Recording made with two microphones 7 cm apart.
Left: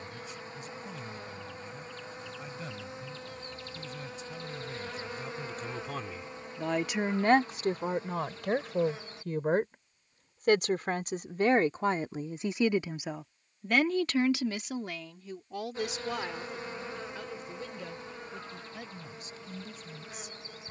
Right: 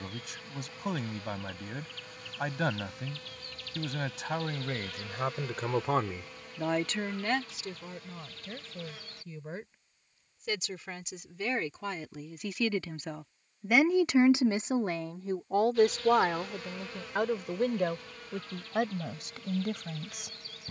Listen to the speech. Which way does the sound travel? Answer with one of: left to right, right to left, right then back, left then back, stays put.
left then back.